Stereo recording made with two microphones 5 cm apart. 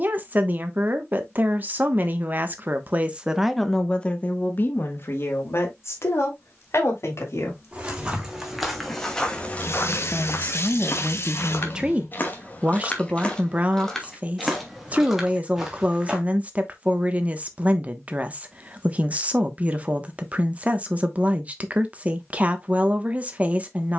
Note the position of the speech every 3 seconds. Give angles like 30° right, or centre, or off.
40° right, 30° left, 60° left, 10° left, 30° right, 30° right, 30° right, 30° right.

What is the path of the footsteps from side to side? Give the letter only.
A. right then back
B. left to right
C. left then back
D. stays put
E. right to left
C.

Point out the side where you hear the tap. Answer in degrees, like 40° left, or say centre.
60° left.